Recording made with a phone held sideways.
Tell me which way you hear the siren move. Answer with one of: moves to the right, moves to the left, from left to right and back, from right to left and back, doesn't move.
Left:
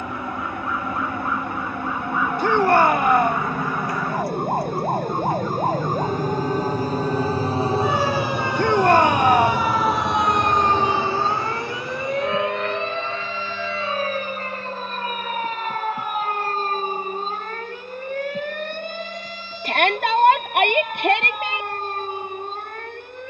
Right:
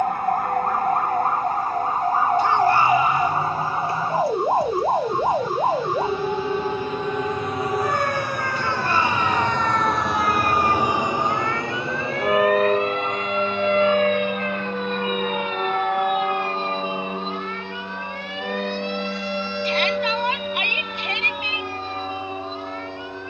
moves to the left.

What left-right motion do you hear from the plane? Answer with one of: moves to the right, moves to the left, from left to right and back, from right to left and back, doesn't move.
moves to the right.